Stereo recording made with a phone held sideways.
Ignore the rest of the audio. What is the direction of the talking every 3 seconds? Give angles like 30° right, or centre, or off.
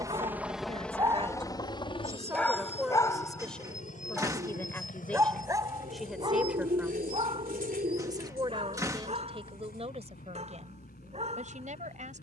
30° right, 10° left, 20° right, 50° right.